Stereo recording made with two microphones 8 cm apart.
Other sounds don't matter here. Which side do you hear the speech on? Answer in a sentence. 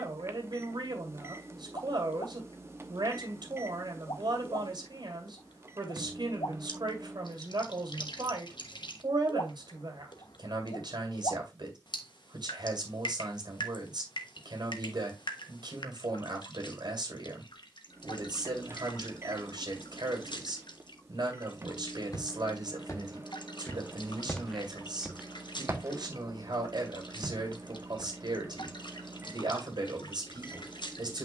In this clip you hear the speech on the right.